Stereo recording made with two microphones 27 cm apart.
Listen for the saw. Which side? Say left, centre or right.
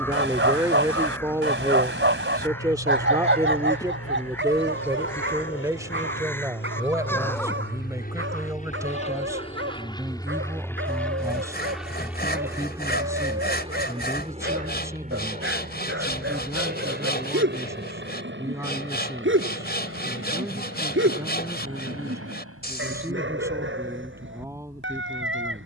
left.